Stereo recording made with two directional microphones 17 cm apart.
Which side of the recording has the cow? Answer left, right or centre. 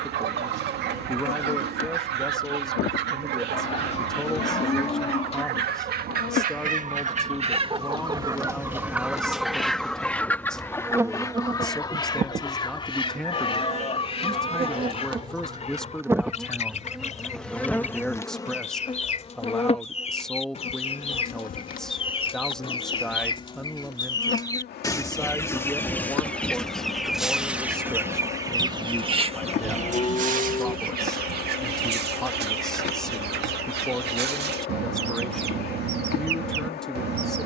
left.